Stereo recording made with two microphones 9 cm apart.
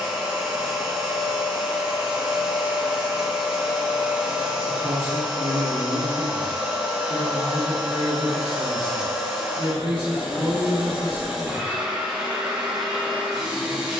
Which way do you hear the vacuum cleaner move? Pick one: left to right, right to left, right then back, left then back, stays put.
stays put.